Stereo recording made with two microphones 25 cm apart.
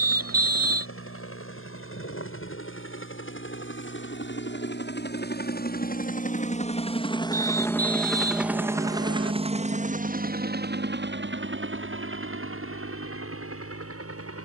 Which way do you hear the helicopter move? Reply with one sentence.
You can hear the helicopter move from left to right.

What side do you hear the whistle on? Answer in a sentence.
You can hear the whistle on the right.